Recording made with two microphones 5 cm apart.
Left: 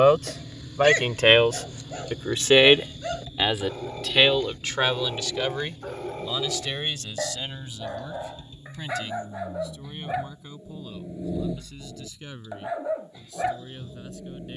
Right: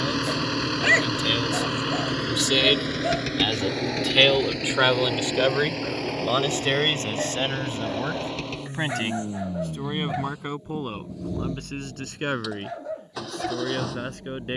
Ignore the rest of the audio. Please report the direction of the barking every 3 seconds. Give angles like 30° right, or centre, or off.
20° right, 10° right, centre, 10° left, 20° left.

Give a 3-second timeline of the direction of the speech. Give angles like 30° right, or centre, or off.
50° left, 10° right, 40° right, 60° right, 60° right.